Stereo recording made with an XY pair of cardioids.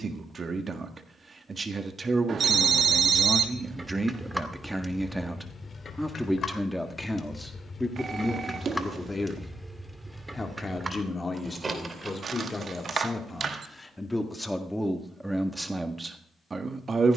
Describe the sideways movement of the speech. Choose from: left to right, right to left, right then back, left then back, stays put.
left then back.